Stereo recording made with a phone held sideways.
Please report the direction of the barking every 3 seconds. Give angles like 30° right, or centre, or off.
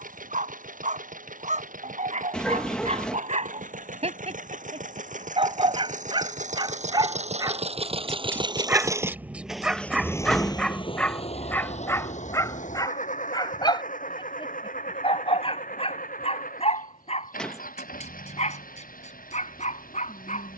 60° right, 50° right, 30° right, centre, 30° left, 50° left, 60° left.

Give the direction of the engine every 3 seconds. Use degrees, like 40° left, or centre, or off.
80° right, 70° right, 50° right, 20° left, 70° left, 80° left, 80° left.